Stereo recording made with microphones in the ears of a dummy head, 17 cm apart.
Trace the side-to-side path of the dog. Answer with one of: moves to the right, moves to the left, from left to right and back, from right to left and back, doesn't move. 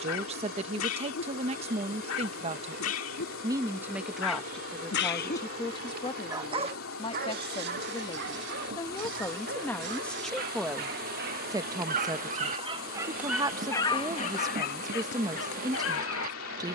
from left to right and back.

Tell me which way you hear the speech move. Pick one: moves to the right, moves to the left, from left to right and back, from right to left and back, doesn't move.
from right to left and back.